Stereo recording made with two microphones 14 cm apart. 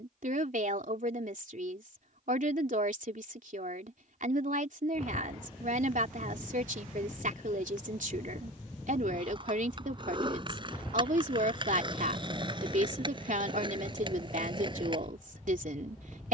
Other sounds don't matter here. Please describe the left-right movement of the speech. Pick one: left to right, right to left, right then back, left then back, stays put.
stays put.